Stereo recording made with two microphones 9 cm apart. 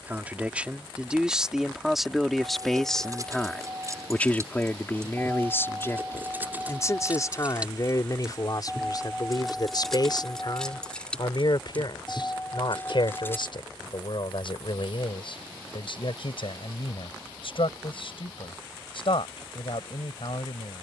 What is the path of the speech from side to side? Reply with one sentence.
In this clip you hear the speech move from right to left.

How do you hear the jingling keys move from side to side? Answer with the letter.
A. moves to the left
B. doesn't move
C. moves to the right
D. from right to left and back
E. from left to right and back
A.